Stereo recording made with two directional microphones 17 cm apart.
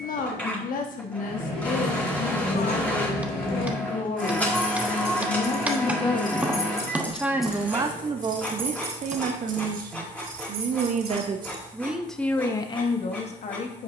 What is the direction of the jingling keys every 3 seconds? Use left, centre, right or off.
left, left, centre, right, off.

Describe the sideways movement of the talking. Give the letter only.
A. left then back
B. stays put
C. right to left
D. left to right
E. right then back
E.